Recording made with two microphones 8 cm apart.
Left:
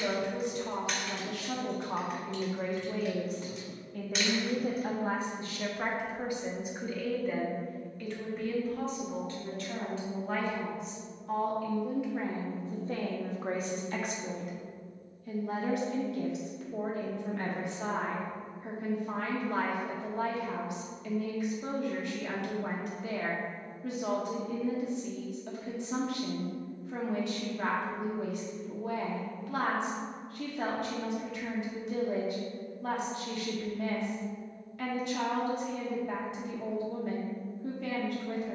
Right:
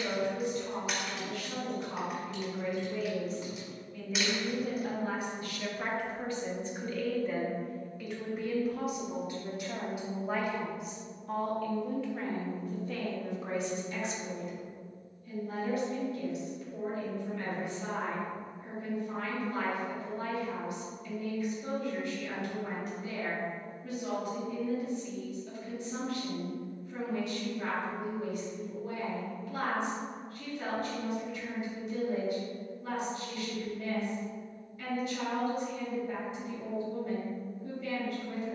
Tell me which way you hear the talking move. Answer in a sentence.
In this clip you hear the talking move from left to right and back again.